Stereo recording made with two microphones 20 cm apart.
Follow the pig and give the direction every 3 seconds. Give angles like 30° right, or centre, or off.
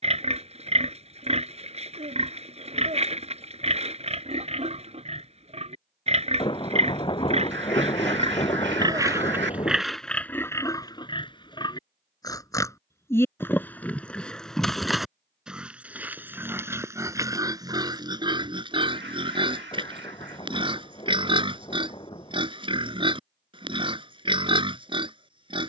30° right, 30° right, 30° right, 10° left, 10° left, 10° right, 20° right, 30° right, 30° right.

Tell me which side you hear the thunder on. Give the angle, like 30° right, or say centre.
20° left.